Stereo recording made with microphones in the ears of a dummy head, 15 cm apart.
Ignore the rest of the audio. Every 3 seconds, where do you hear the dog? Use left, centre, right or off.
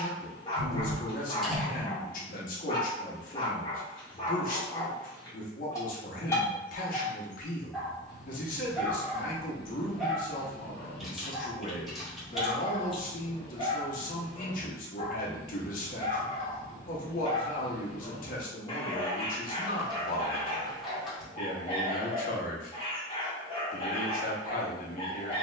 left, left, centre, centre, left, left, left, left, left.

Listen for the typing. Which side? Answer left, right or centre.
centre.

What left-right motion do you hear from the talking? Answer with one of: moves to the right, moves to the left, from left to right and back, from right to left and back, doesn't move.
doesn't move.